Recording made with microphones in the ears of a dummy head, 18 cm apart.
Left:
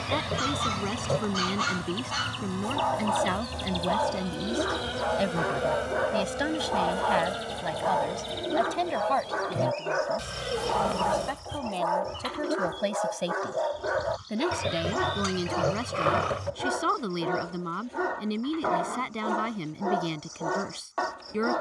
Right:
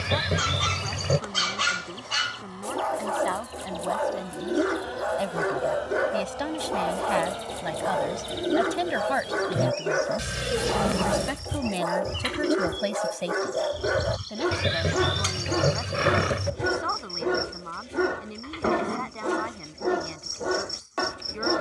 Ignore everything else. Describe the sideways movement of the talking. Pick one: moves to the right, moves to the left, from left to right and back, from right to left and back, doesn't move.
from left to right and back.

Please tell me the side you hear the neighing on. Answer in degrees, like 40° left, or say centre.
20° right.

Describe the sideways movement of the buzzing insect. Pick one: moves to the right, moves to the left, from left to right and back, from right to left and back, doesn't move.
moves to the right.